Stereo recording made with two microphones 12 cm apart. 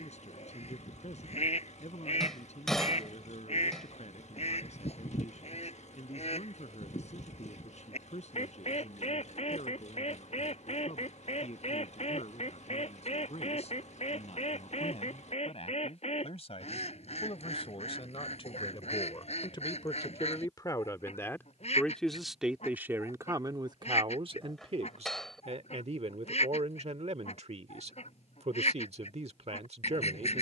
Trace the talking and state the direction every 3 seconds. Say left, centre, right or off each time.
left, left, left, left, left, left, left, centre, right, right.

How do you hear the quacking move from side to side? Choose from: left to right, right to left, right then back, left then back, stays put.
stays put.